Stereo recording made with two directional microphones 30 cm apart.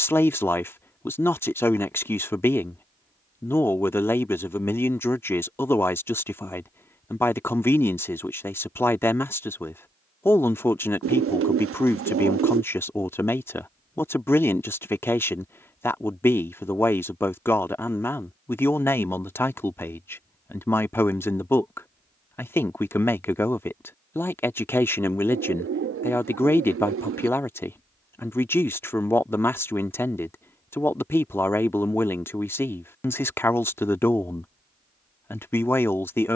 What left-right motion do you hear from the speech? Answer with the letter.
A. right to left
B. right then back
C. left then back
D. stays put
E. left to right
D.